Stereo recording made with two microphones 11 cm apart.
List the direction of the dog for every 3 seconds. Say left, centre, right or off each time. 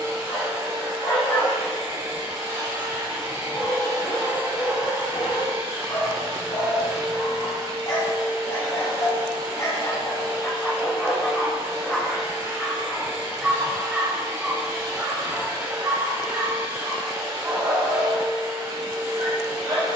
left, left, left, left, centre, right, right.